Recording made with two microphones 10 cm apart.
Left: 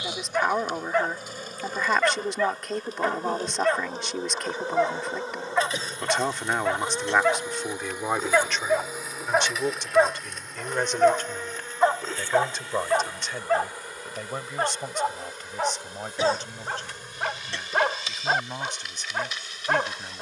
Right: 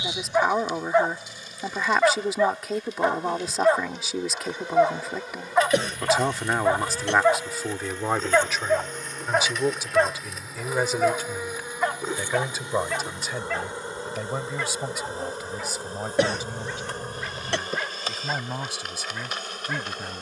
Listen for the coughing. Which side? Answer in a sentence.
You can hear the coughing on the right.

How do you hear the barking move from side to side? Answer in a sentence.
In this clip you hear the barking travel towards the left.